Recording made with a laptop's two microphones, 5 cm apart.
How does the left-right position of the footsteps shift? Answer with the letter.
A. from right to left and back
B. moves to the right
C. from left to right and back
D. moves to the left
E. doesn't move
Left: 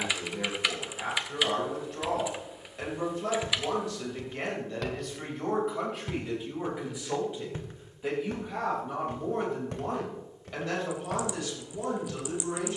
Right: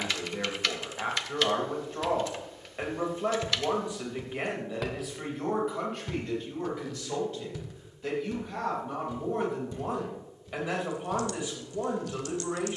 D.